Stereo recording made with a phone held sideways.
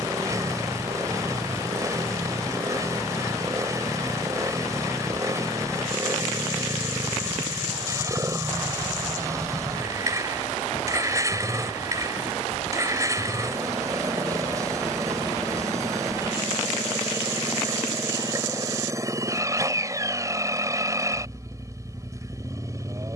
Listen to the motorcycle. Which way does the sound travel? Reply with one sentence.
In this clip you hear the motorcycle stay in one place.